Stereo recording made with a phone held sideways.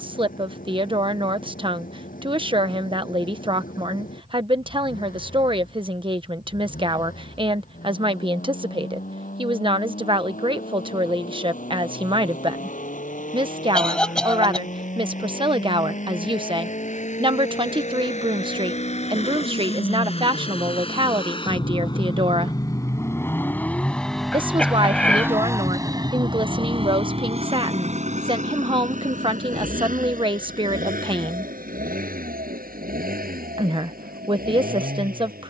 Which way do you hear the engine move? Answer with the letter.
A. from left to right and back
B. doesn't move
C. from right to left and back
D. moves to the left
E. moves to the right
E.